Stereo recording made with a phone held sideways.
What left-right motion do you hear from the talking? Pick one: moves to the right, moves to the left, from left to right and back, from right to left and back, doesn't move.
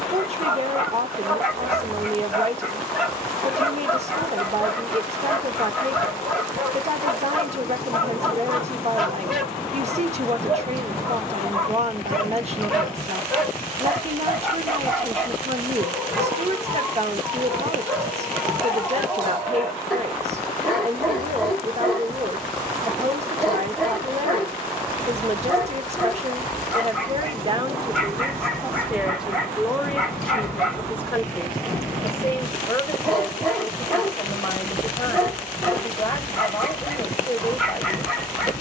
moves to the left.